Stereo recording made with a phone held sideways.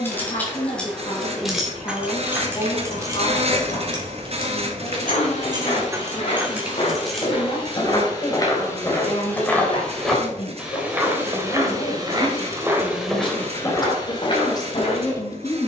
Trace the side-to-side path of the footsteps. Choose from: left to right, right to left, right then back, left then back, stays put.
right then back.